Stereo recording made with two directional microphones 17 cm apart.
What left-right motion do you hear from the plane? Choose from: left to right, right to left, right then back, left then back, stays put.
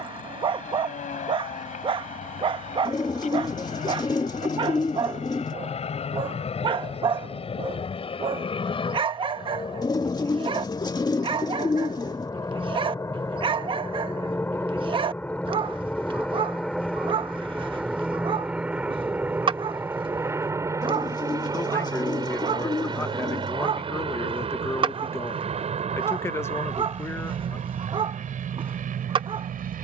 left to right.